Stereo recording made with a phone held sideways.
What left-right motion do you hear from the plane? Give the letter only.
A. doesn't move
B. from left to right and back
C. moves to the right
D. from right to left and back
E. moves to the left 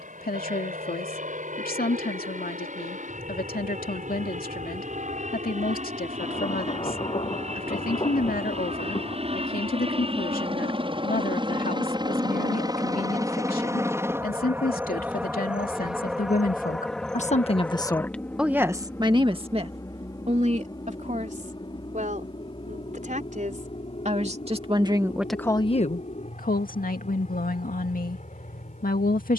E.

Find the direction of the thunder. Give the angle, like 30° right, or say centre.
40° left.